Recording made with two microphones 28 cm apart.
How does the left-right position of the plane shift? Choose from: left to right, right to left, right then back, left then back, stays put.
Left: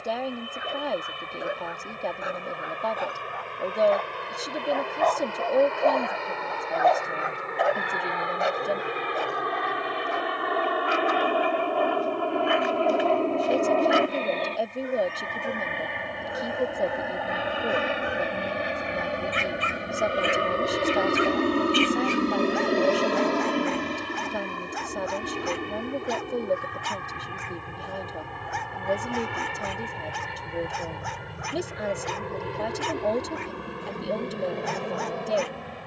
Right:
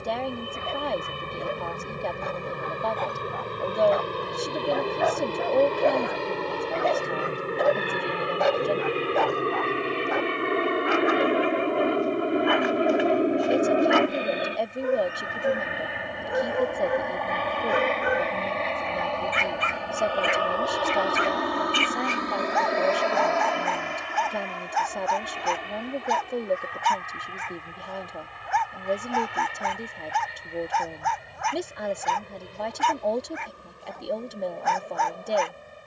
right to left.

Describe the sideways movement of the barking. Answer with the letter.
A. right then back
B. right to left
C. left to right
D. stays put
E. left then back
C.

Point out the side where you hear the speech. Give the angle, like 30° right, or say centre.
centre.